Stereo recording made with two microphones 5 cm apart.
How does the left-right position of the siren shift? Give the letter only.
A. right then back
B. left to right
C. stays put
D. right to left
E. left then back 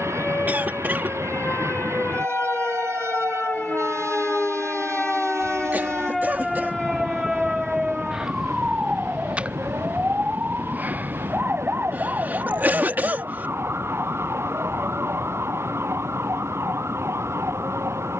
B.